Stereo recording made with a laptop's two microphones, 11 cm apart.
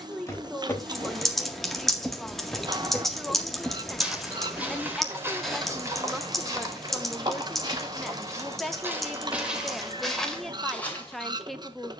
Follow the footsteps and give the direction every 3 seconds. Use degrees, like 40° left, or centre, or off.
10° left, 20° right, 30° right, centre.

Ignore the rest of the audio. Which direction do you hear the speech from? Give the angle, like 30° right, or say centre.
centre.